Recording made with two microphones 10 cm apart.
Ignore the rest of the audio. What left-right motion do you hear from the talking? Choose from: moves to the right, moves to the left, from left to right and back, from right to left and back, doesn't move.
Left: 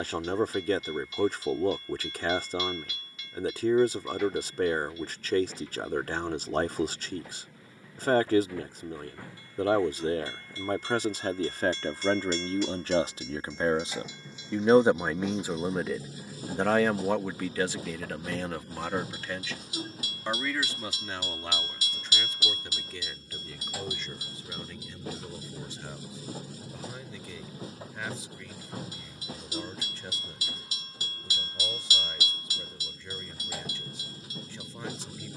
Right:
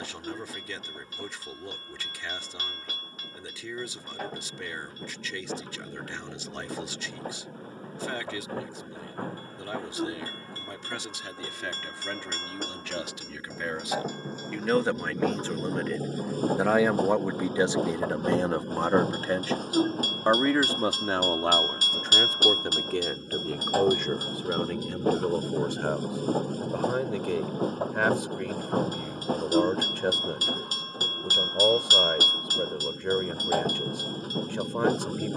moves to the right.